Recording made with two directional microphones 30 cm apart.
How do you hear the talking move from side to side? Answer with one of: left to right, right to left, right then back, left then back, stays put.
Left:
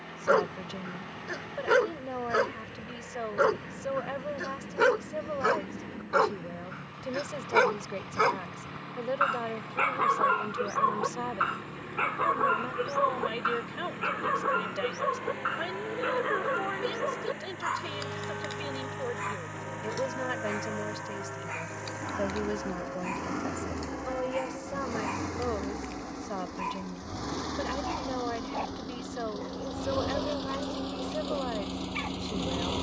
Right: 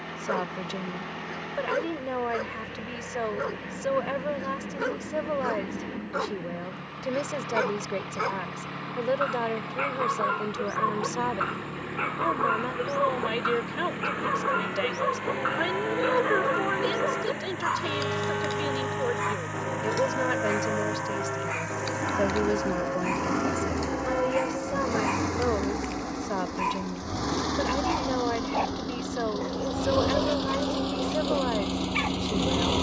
stays put.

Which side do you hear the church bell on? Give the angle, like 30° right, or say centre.
70° right.